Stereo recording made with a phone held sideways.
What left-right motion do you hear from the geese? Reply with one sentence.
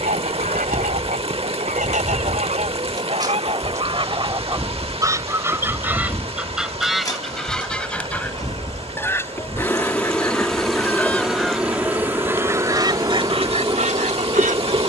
In this clip you hear the geese move from right to left and back again.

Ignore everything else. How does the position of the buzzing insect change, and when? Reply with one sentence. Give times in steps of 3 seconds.
In this clip you hear the buzzing insect on the right from 0 s, in the centre from 3 s, on the left from 6 s, in the centre from 9 s and on the right from 12 s.